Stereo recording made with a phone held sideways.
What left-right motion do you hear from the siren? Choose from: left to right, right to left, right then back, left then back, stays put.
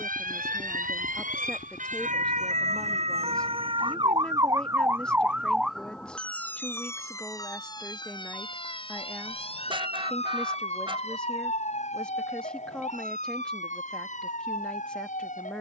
right to left.